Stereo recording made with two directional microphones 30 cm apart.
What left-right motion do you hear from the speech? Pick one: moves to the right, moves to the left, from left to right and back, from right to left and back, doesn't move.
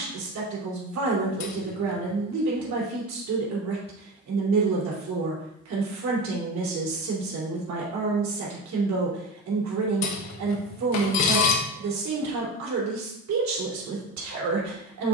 doesn't move.